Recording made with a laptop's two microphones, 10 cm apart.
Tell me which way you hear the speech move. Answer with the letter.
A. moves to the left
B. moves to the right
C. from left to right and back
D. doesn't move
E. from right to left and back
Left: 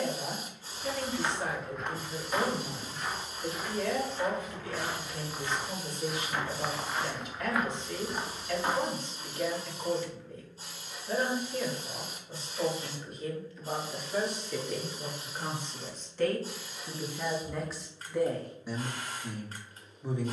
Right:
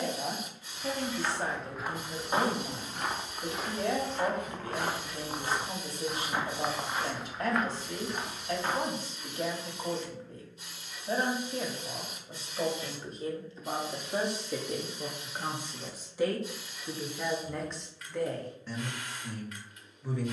A.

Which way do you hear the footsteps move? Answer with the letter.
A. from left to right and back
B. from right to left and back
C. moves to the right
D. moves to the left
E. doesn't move
A.